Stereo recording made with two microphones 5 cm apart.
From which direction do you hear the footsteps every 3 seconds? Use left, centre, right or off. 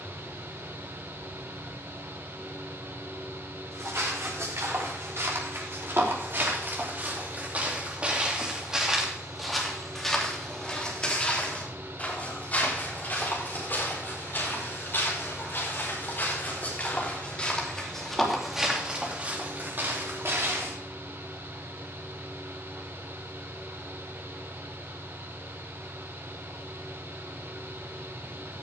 off, right, right, centre, left, left, right, off, off, off.